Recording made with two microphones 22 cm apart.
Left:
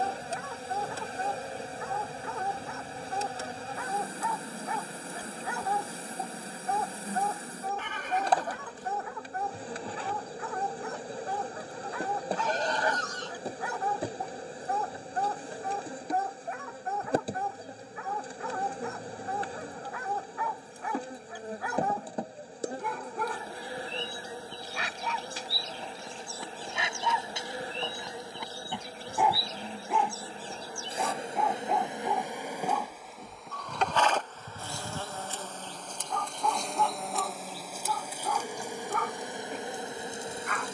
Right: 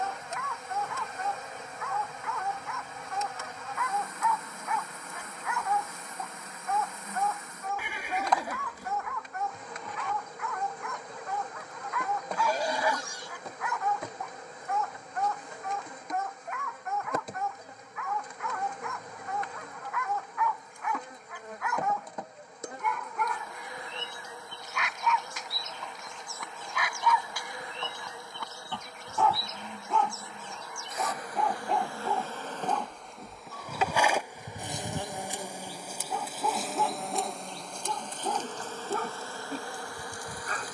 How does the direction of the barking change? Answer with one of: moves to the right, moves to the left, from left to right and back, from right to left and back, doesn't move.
moves to the right.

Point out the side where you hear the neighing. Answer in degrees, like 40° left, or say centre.
10° right.